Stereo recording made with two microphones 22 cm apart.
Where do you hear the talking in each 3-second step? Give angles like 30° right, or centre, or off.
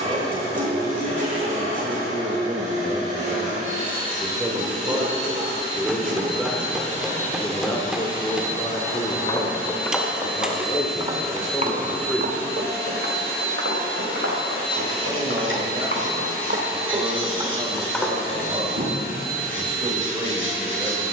20° right, 10° right, 10° left, 30° left, 10° right, 20° right, 20° right.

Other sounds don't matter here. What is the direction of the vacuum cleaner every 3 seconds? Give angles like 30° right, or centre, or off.
30° right, 30° right, 30° right, centre, 20° left, 30° left, 40° left.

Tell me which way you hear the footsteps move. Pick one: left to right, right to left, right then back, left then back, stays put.
right then back.